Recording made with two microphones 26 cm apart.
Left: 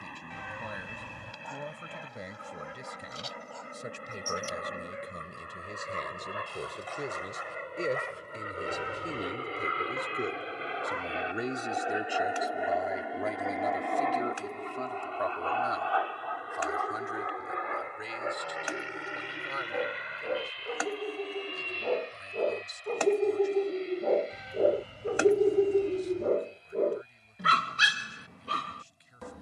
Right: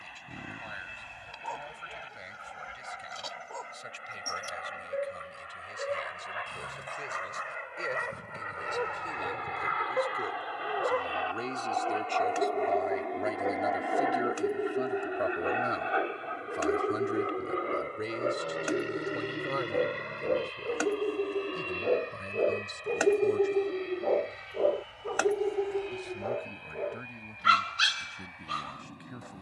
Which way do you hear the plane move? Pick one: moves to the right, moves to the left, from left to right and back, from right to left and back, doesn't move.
moves to the right.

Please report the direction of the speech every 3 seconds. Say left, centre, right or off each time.
left, left, left, left, centre, right, right, right, right, right.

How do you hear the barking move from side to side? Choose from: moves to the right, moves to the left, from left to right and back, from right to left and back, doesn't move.
moves to the left.